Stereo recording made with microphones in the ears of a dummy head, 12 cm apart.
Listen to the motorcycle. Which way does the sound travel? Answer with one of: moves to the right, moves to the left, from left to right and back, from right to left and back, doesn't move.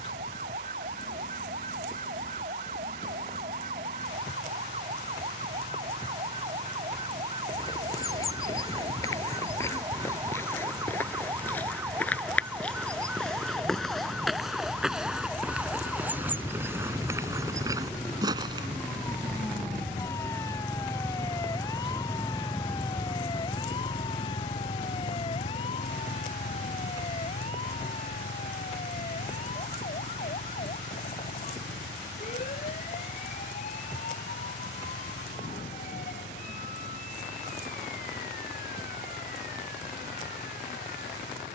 moves to the left.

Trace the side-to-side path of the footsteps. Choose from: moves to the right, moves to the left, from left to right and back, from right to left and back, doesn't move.
moves to the right.